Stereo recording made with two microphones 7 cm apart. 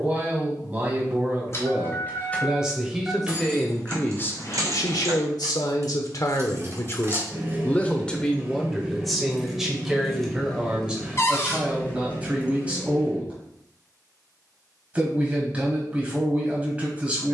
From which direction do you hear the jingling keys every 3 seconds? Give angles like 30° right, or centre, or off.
20° left, 40° right, 30° right, 10° left, 30° left, off.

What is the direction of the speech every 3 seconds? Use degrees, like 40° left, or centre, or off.
20° right, 40° left, 30° left, 10° right, 20° right, 20° right.